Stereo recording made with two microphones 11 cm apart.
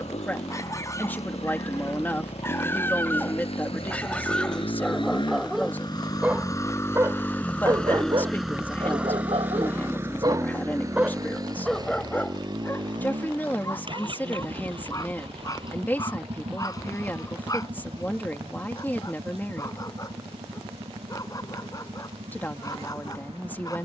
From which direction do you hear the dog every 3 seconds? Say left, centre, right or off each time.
left, centre, right, right, left, left, left, left.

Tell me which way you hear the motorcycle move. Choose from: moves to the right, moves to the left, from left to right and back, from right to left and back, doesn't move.
moves to the right.